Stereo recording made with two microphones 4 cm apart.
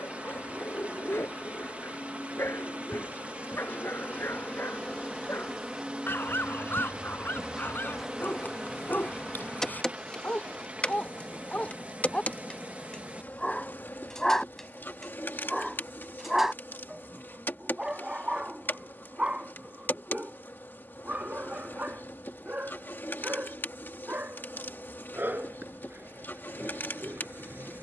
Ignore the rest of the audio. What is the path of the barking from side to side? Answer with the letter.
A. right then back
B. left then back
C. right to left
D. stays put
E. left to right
E.